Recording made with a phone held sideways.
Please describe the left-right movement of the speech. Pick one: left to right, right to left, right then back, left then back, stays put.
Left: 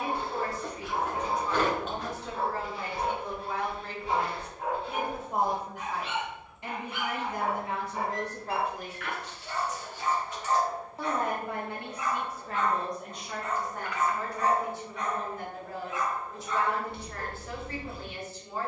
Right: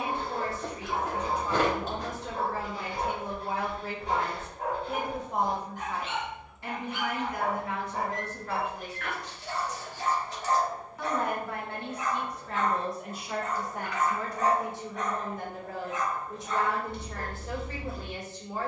left then back.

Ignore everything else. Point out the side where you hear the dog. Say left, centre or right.
right.